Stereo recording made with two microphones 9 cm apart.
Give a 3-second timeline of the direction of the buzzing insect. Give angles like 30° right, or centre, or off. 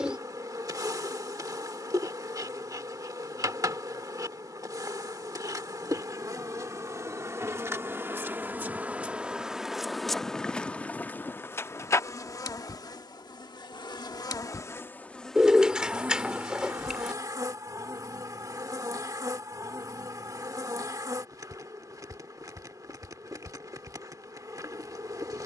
40° right, 40° right, 30° right, 10° left, 40° left, 20° right, 40° right, 40° right, 40° right.